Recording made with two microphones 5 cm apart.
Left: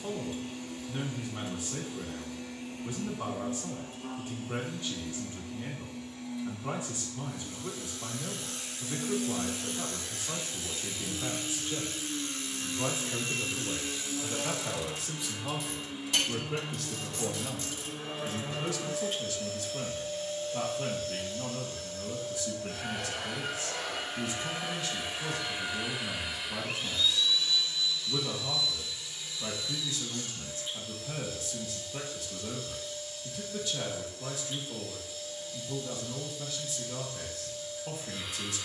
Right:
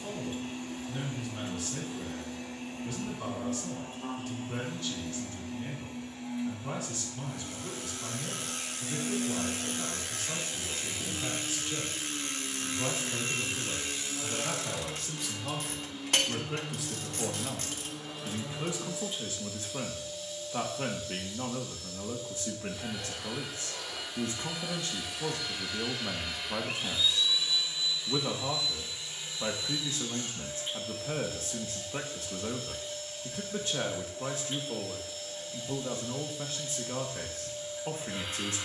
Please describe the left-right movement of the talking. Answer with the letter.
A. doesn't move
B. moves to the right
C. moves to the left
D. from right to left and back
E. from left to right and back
B.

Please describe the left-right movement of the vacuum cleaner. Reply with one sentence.
You can hear the vacuum cleaner move from right to left and back again.